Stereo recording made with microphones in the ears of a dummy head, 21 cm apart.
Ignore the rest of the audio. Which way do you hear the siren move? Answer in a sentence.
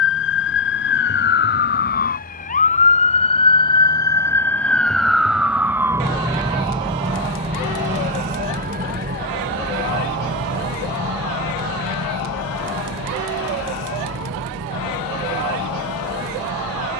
You can hear the siren move from left to right.